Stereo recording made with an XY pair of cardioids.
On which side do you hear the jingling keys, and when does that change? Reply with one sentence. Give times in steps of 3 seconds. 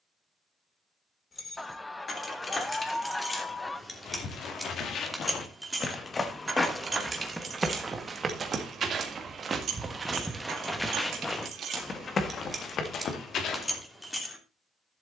You can hear the jingling keys on the left from 0 s, in the centre from 3 s, on the right from 6 s and in the centre from 12 s.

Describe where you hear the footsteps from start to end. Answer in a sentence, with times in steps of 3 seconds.
You can hear the footsteps not at all from 0 s, on the left from 3 s, in the centre from 6 s and on the left from 12 s.